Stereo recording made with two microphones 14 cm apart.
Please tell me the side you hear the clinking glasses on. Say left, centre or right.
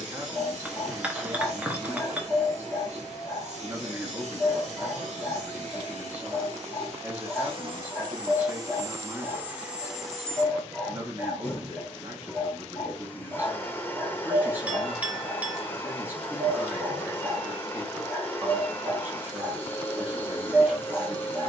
centre.